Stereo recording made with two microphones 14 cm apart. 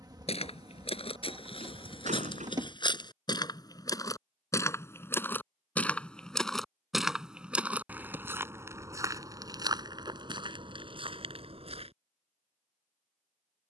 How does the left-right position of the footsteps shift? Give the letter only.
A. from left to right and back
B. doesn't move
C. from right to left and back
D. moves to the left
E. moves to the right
E.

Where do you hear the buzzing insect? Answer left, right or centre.
right.